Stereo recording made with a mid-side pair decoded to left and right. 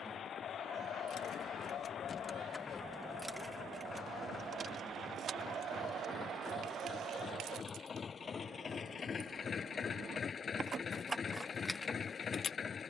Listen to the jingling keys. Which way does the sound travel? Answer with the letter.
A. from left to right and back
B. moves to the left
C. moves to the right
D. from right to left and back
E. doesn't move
A.